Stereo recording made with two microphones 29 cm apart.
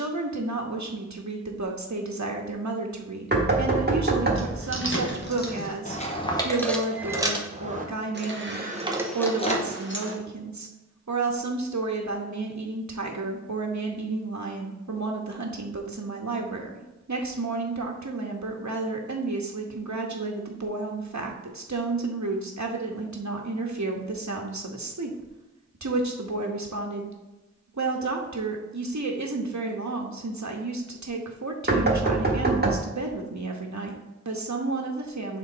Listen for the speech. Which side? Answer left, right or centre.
right.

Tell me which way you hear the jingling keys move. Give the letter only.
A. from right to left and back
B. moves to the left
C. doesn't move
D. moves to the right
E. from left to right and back
E.